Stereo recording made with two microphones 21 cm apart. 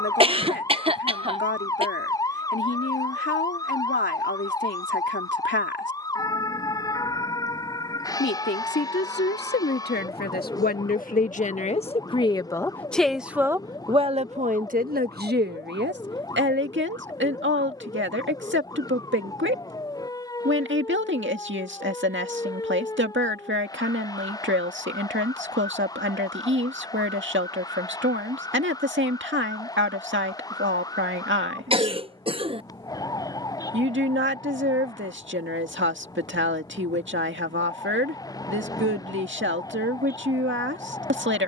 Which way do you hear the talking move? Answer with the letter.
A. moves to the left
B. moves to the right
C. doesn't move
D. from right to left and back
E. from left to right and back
B.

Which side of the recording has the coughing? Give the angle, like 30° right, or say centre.
30° right.